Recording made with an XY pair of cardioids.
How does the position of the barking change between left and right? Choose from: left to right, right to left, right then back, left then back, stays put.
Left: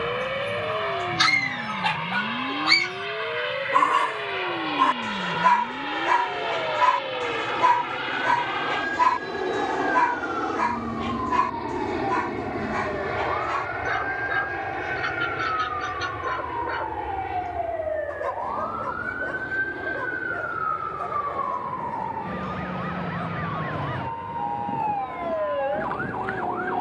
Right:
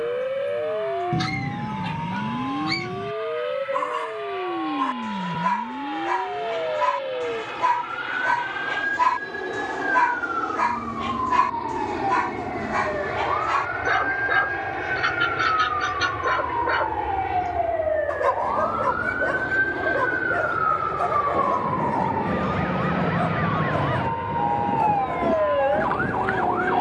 left to right.